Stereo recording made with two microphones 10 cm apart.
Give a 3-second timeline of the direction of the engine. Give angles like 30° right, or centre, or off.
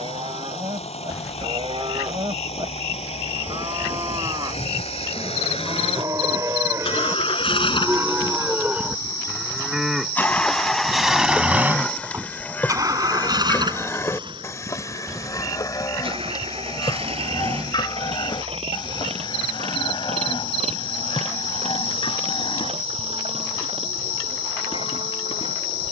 80° left, 70° left, 50° left, 10° left, 40° right, 60° right, 70° right, 70° right, 70° right.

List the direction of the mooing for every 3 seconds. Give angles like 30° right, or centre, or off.
50° right, 40° right, 20° right, centre, 20° left, 40° left, 50° left, 60° left, 60° left.